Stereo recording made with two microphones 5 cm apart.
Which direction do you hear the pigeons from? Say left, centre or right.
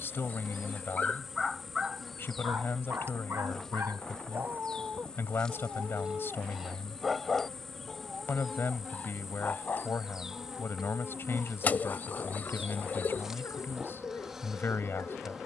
left.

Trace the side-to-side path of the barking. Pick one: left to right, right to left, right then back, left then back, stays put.
right then back.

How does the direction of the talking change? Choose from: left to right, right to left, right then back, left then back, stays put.
stays put.